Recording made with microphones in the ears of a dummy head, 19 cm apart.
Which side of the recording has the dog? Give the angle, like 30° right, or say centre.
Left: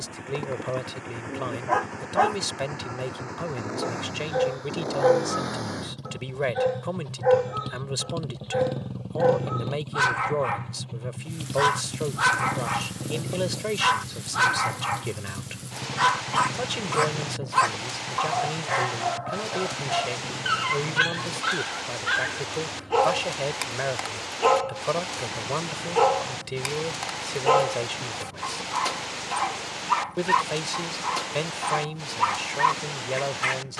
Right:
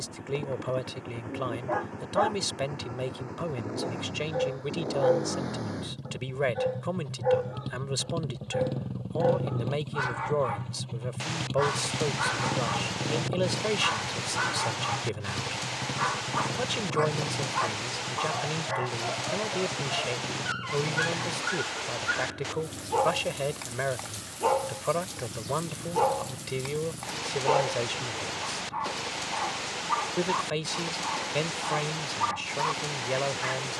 70° left.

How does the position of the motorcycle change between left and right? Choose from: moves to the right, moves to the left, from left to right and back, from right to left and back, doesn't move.
moves to the right.